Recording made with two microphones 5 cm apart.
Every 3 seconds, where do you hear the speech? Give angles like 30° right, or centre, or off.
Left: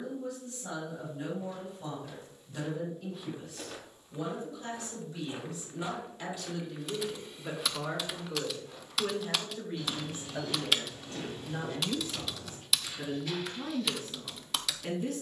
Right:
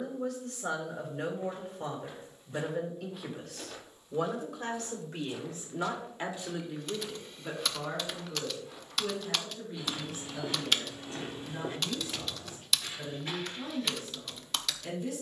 70° right, 60° right, centre, 40° left, 50° left.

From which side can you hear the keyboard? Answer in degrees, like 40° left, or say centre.
centre.